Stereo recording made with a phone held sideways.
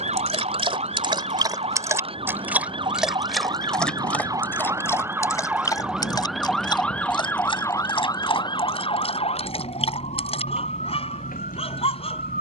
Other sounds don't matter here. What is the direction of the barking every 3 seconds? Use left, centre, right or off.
right, centre, left, left.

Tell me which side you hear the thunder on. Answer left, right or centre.
left.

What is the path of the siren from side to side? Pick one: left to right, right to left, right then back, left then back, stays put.
right to left.